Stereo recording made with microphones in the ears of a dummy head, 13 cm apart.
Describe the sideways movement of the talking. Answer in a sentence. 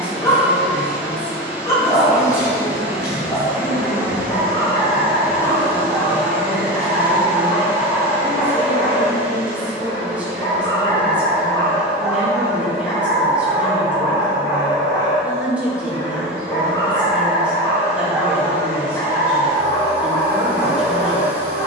In this clip you hear the talking stay in one place.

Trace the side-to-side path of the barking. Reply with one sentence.
You can hear the barking stay in one place.